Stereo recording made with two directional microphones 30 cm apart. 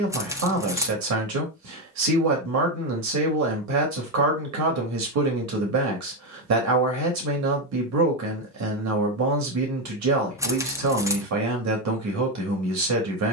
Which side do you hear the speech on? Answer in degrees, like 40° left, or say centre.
70° right.